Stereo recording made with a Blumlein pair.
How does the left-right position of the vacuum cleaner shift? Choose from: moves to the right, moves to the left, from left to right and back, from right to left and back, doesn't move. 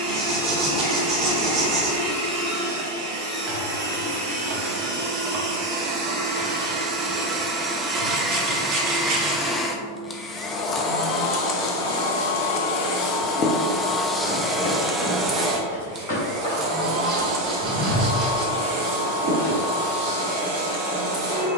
from right to left and back.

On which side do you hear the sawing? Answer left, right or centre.
right.